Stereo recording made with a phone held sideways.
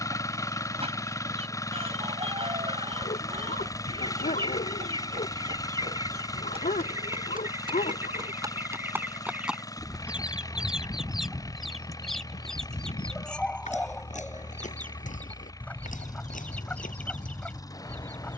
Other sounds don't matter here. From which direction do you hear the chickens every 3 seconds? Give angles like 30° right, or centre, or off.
40° right, 30° right, 20° right, 10° right, 10° left, 10° left.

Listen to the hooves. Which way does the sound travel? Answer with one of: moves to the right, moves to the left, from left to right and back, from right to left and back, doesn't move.
moves to the left.